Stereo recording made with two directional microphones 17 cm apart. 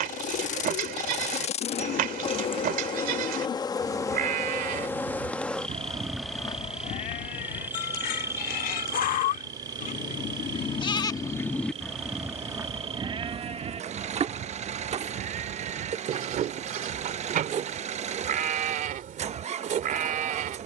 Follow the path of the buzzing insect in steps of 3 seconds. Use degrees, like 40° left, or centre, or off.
40° left, 20° left, 10° right, 30° right, 40° right, 50° right, 50° right.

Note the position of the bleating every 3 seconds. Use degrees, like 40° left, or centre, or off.
60° right, 50° right, 50° left, 30° left, 30° right, 60° right, 60° right.